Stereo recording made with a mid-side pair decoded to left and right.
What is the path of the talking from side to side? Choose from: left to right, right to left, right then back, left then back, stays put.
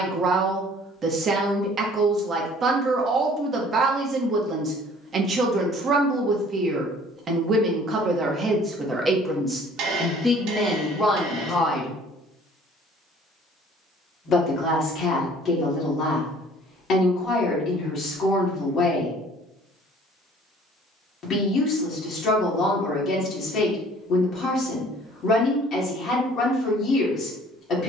right to left.